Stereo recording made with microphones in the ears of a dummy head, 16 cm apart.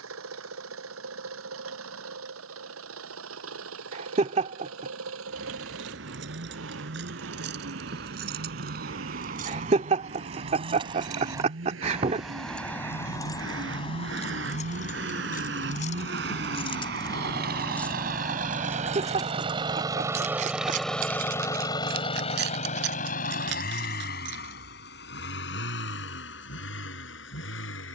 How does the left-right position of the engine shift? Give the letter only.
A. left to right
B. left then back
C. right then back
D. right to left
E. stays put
D.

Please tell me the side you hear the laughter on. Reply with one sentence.
In this clip you hear the laughter on the right.